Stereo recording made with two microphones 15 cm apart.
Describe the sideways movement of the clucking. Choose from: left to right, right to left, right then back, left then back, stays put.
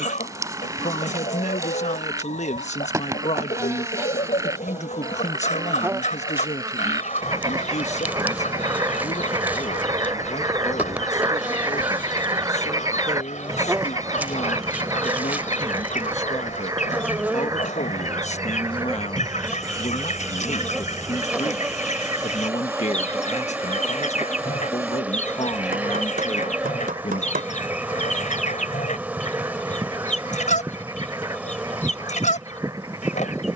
stays put.